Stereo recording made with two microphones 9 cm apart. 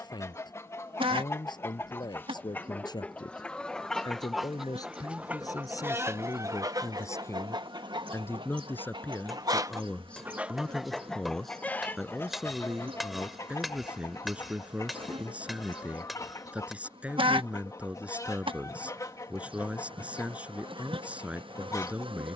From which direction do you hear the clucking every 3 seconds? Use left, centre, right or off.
left, centre, right, centre, left, left, left, left.